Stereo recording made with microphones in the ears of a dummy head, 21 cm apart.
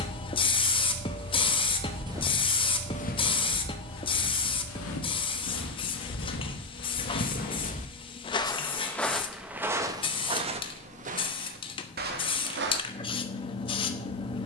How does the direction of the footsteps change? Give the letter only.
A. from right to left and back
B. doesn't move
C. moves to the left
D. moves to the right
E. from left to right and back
A.